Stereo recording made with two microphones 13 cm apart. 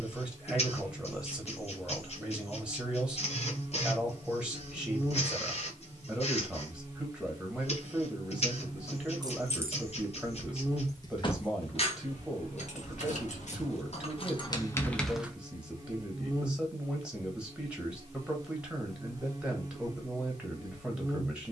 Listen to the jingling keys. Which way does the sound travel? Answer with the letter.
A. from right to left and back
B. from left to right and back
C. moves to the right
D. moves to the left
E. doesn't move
A.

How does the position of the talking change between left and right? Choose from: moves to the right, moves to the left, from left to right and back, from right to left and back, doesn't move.
doesn't move.